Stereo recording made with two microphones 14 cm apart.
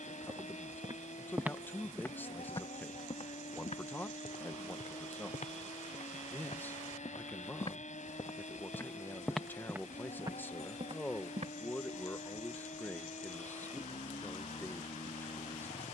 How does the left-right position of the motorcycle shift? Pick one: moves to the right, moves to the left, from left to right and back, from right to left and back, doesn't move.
doesn't move.